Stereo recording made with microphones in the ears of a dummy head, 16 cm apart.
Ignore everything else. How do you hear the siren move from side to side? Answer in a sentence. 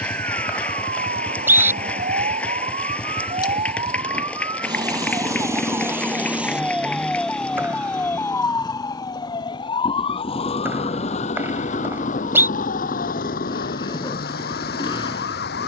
In this clip you hear the siren go from the right side to the left.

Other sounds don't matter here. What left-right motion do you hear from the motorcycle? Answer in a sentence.
In this clip you hear the motorcycle stay in one place.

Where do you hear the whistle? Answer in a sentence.
You can hear the whistle in the centre.